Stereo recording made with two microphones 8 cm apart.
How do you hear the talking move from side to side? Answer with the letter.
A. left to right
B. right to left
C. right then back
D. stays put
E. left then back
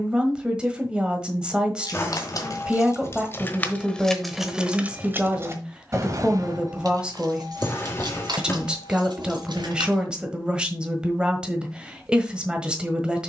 D.